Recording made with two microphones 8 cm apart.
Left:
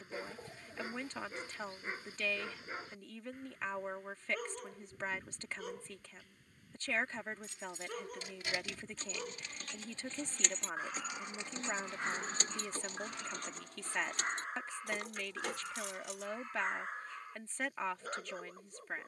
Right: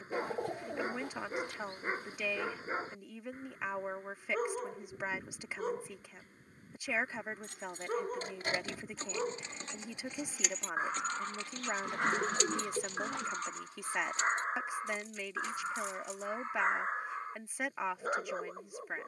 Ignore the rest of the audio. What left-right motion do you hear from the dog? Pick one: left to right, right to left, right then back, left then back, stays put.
stays put.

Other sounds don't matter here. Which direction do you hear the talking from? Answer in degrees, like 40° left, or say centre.
10° right.